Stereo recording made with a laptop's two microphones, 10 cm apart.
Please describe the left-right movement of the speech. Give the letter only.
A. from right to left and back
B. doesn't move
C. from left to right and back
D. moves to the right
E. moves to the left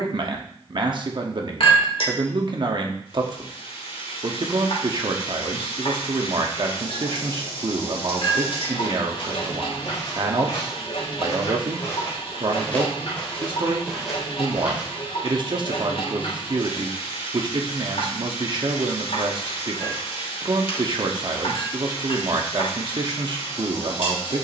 B.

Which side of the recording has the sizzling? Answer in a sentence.
In this clip you hear the sizzling on the left.